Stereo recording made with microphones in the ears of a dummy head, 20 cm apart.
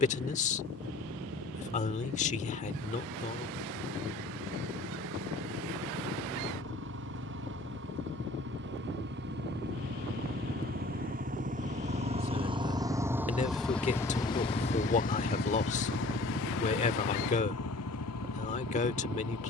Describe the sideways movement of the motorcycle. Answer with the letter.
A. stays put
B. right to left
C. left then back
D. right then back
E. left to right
B.